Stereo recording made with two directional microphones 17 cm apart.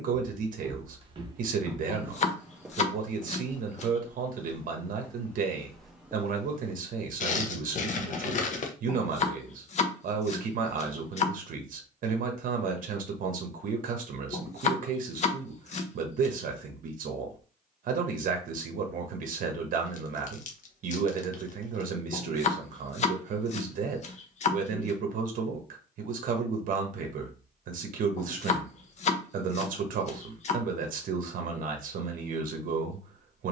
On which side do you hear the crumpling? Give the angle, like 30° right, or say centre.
50° left.